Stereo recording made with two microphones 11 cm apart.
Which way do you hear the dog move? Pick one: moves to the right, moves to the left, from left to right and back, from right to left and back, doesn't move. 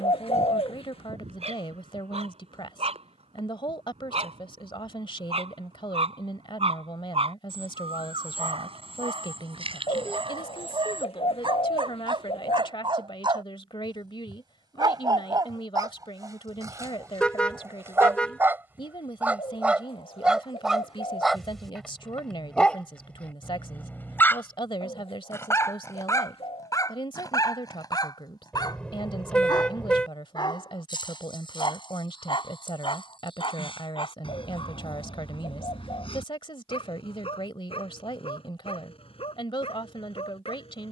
moves to the left.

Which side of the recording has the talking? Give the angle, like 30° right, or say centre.
50° left.